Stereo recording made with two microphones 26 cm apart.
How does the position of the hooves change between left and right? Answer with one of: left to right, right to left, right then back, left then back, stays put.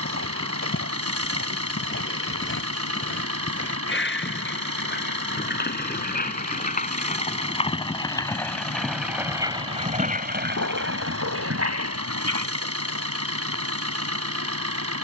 left to right.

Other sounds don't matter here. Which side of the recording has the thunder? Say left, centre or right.
right.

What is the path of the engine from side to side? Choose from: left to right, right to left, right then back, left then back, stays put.
stays put.